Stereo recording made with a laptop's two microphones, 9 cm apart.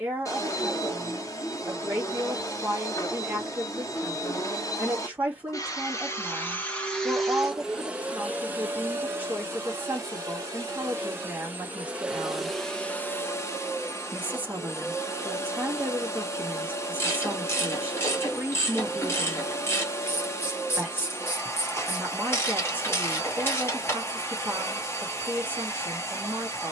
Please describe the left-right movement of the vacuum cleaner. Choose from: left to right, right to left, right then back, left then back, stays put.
right then back.